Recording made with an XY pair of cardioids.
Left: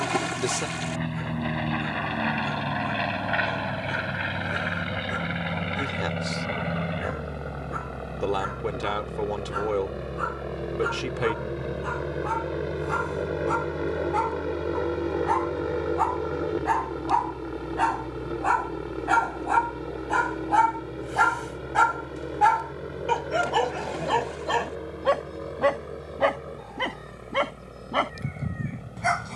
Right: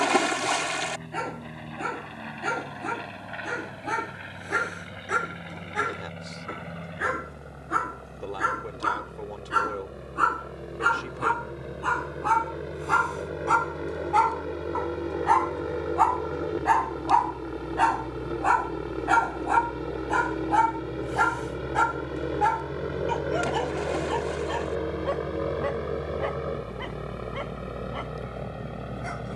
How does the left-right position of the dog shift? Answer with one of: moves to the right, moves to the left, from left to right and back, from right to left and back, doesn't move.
moves to the left.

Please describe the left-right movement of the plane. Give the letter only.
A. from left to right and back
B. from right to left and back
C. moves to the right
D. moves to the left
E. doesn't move
C.